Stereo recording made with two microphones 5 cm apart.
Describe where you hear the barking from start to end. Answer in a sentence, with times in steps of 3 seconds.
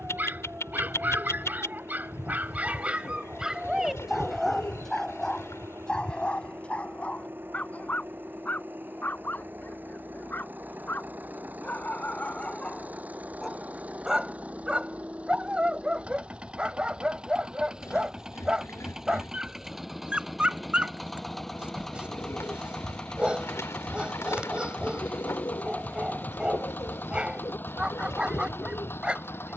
You can hear the barking on the right from 0 s, in the centre from 3 s, on the left from 6 s, in the centre from 12 s and on the right from 15 s.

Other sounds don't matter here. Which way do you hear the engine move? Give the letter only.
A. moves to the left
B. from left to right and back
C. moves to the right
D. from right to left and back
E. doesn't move
A.